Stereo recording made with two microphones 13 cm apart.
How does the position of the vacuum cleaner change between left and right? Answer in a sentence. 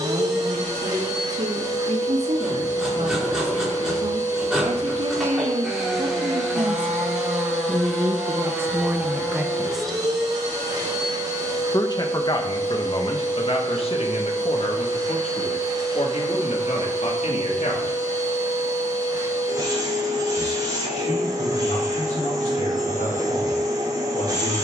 You can hear the vacuum cleaner stay in one place.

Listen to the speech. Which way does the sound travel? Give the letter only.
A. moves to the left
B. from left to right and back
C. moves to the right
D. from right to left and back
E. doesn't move
A.